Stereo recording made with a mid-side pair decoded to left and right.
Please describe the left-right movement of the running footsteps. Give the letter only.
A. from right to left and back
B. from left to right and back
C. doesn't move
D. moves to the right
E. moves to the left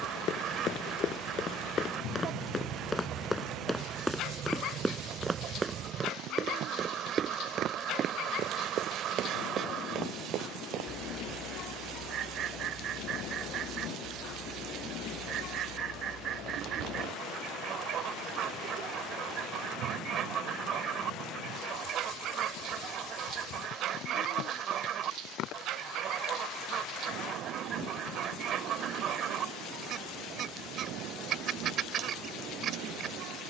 D.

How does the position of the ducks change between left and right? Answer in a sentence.
You can hear the ducks stay in one place.